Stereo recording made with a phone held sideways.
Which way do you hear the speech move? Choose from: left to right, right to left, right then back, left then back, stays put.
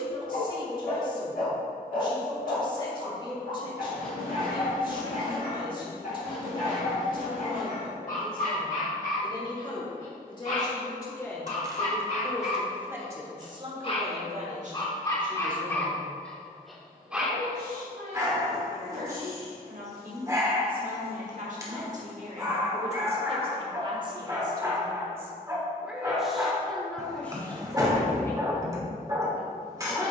right then back.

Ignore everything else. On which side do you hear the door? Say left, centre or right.
right.